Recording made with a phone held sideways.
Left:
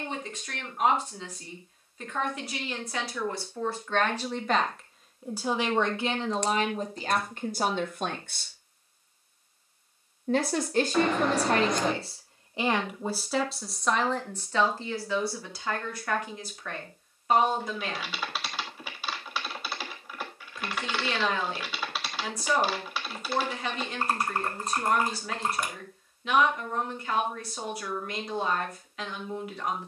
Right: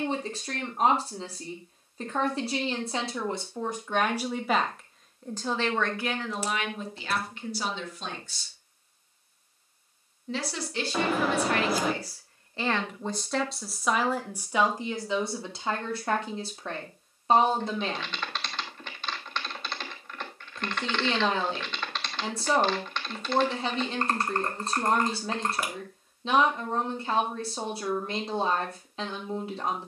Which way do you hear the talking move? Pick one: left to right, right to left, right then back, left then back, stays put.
left then back.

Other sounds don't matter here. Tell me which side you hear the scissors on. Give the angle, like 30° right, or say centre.
centre.